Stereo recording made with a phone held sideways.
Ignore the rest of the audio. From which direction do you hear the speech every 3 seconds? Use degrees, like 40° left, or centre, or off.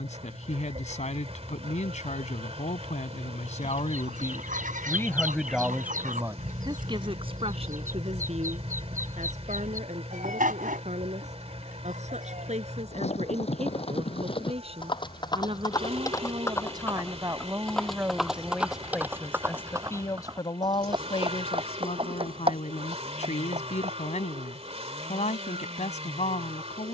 60° left, 30° left, 40° right, 60° right, 50° right, 30° right, 10° left, 50° left, 60° left.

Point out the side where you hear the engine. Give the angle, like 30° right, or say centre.
50° right.